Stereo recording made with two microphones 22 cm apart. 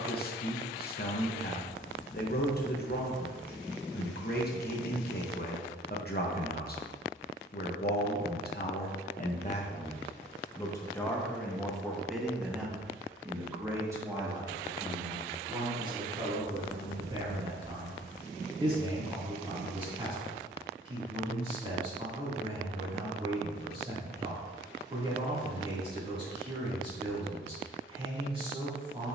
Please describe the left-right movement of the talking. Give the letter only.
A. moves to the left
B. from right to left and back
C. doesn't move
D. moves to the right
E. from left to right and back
D.